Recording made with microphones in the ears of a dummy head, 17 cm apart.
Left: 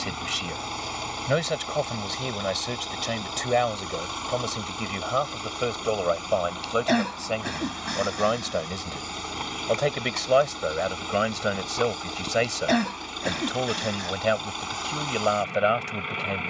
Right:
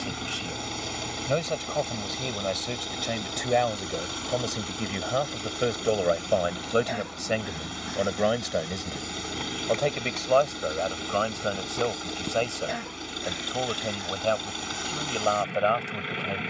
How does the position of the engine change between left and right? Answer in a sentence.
You can hear the engine stay put.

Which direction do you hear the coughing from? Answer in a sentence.
You can hear the coughing on the left.